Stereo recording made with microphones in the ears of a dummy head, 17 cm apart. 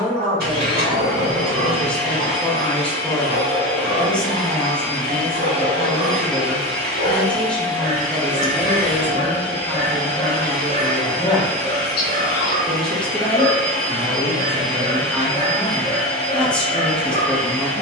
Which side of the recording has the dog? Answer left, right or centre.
right.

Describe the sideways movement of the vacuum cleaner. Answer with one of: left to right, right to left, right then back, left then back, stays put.
stays put.